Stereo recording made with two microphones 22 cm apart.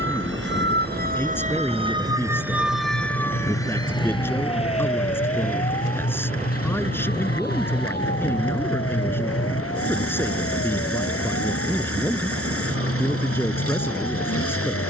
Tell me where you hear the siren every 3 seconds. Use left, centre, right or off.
right, left, left, left, left.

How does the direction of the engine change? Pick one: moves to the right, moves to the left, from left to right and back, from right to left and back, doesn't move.
doesn't move.